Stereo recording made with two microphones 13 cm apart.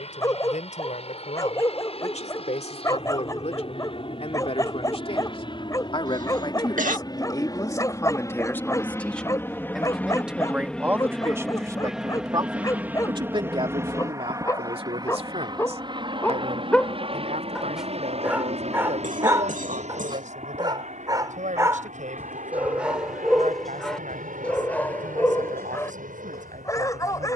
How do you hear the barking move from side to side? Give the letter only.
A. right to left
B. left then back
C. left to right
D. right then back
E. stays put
D.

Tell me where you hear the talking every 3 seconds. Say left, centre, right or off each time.
left, left, left, centre, right, right, right, right, right.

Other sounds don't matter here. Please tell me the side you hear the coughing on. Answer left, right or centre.
right.